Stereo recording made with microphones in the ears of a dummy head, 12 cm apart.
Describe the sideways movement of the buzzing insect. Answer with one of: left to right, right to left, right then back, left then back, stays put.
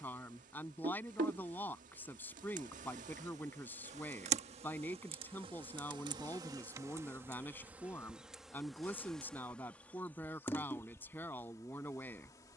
right to left.